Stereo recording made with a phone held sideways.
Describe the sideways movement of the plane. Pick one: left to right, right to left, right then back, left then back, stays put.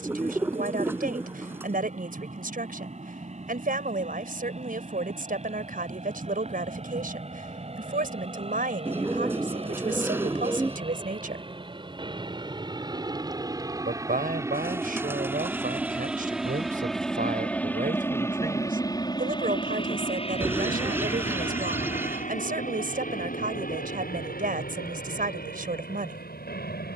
right to left.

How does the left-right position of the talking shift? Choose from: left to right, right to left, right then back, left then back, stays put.
stays put.